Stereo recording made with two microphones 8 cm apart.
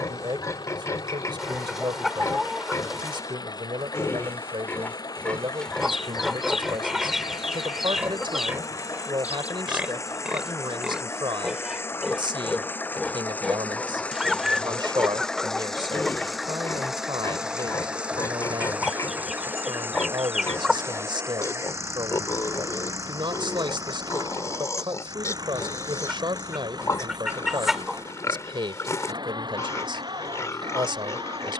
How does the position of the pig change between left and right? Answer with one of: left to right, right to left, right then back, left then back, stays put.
right then back.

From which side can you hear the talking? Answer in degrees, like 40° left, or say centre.
80° right.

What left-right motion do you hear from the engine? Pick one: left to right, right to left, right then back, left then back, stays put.
left to right.